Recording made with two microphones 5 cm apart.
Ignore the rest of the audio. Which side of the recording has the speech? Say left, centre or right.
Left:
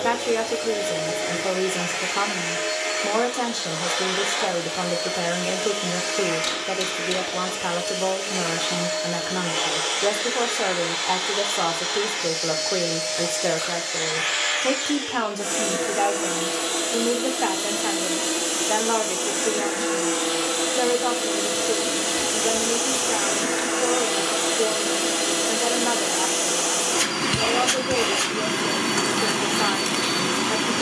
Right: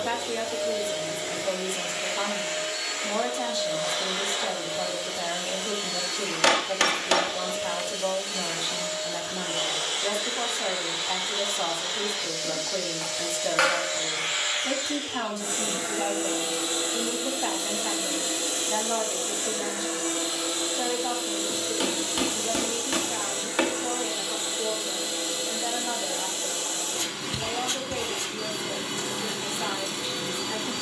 left.